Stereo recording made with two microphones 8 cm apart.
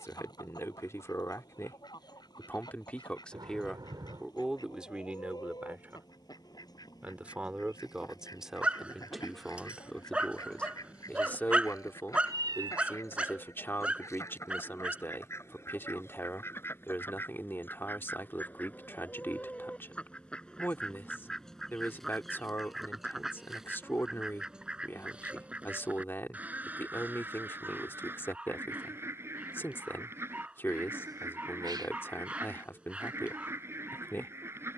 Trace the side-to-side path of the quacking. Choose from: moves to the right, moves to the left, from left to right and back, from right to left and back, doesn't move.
moves to the right.